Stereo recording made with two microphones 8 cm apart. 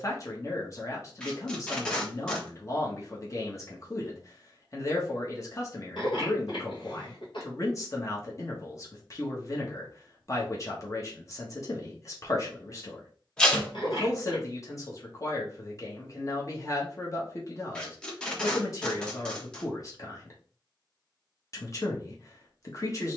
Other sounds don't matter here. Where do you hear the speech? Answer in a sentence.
In this clip you hear the speech on the left.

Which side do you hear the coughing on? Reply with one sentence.
In this clip you hear the coughing on the left.